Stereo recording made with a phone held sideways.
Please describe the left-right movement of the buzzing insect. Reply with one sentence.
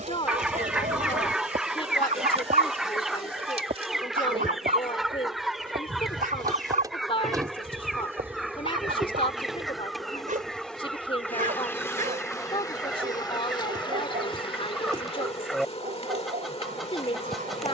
In this clip you hear the buzzing insect move from right to left.